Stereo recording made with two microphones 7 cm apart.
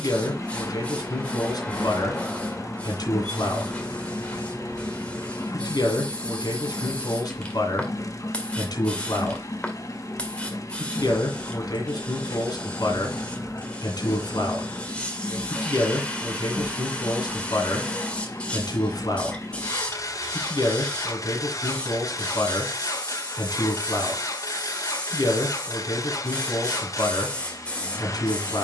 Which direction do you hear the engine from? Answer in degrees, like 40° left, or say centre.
50° left.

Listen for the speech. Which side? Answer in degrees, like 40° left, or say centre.
70° left.